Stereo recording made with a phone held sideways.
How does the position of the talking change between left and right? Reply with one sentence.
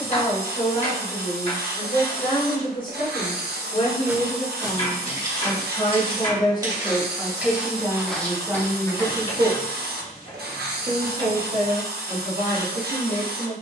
In this clip you hear the talking go from the left side to the right.